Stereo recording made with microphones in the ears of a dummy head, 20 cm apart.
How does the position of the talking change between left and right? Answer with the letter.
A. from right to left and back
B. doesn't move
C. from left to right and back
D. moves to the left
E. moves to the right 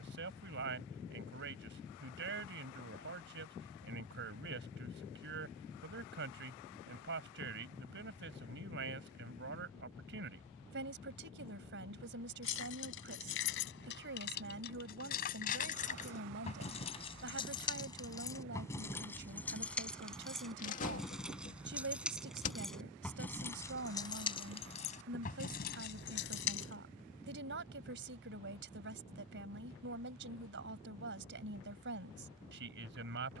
B.